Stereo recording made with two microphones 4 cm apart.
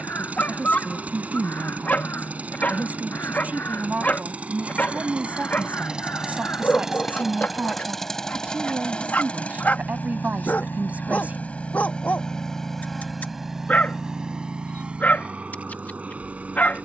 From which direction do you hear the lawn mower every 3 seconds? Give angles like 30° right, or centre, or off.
40° right, 30° right, centre, 30° left, 10° right, 30° right.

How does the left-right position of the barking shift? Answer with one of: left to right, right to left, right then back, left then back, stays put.
stays put.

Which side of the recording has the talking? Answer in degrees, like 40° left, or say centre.
40° right.